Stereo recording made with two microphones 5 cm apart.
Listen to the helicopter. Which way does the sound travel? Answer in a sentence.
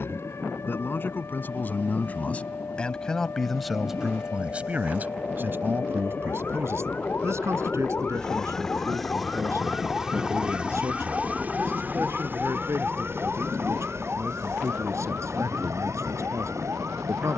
You can hear the helicopter travel towards the right.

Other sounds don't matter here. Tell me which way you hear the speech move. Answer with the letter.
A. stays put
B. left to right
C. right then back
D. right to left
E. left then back
B.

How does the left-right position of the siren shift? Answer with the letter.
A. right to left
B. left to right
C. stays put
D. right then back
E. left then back
B.